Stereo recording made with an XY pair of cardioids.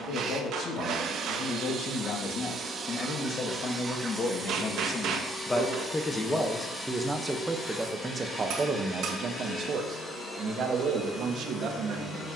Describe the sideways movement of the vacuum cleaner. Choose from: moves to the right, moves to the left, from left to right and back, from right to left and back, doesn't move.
moves to the left.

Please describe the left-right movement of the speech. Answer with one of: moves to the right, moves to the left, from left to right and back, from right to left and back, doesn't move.
moves to the right.